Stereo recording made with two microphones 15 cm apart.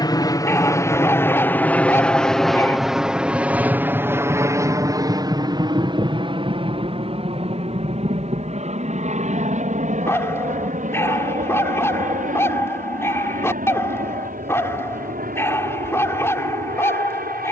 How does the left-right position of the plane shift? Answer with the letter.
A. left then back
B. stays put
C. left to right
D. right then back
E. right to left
C.